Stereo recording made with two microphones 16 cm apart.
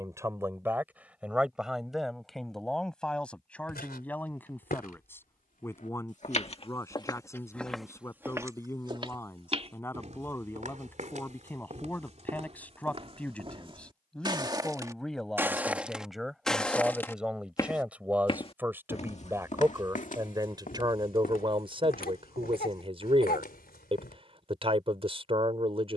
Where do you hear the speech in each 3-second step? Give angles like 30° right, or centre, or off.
10° right, 10° left, 20° left, 10° left, 10° left, centre, 20° right, 30° right, 40° right.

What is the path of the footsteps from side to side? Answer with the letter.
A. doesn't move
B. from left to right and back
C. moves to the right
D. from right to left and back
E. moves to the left
B.